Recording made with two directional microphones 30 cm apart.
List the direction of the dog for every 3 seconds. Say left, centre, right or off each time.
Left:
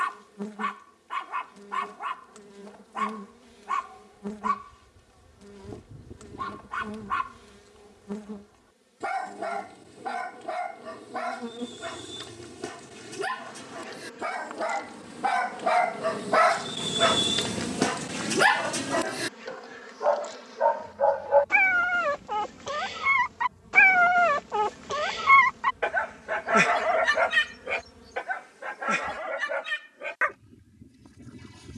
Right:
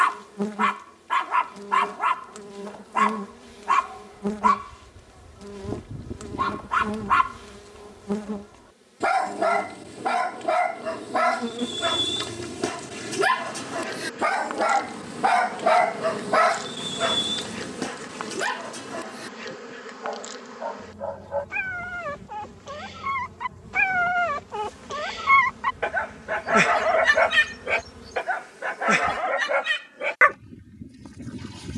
right, right, right, right, right, centre, left, left, centre, right, right.